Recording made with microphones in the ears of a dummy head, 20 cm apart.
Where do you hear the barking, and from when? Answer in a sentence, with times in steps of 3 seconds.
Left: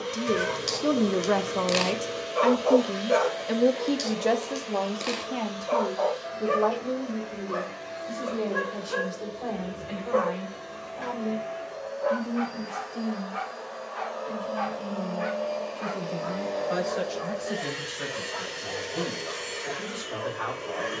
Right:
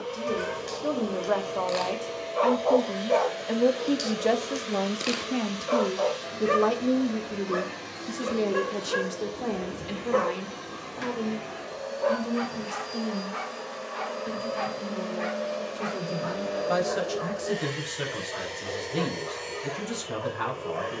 In this clip you hear the barking on the left from 0 s, in the centre from 3 s and on the right from 6 s.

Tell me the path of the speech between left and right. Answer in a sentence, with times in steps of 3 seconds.
In this clip you hear the speech on the left from 0 s, in the centre from 3 s and on the right from 6 s.